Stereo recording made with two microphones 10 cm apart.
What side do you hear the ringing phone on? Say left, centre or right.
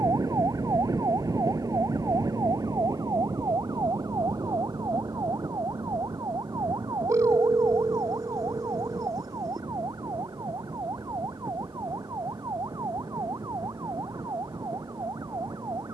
right.